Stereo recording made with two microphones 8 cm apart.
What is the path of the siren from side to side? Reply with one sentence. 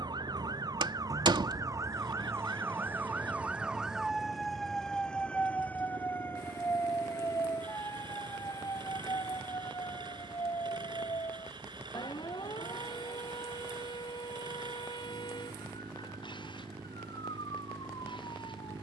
In this clip you hear the siren move from right to left.